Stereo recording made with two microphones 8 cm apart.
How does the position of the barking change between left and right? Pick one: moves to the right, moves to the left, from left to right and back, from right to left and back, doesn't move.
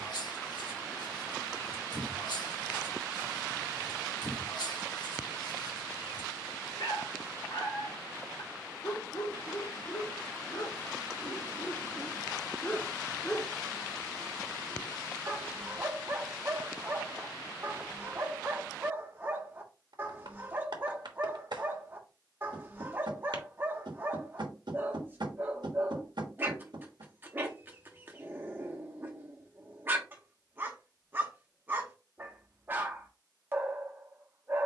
moves to the right.